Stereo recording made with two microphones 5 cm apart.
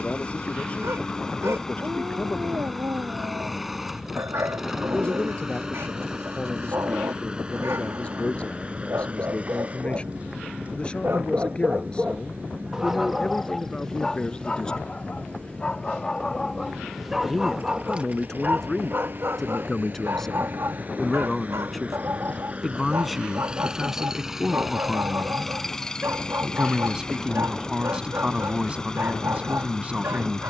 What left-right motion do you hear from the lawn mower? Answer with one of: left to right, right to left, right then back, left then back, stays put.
right then back.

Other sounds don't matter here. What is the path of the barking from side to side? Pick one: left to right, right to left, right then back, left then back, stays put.
left then back.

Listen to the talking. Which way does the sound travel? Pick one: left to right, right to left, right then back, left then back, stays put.
left to right.